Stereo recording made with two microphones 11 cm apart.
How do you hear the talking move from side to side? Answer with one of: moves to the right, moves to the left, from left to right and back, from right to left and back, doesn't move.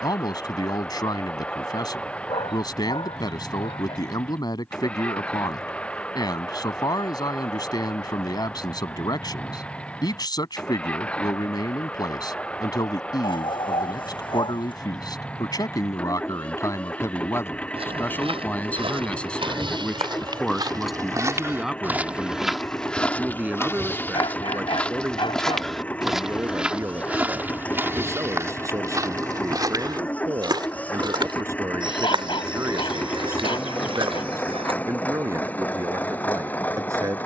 moves to the right.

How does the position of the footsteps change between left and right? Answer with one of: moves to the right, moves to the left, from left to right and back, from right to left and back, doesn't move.
from right to left and back.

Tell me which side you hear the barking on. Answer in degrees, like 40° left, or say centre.
50° left.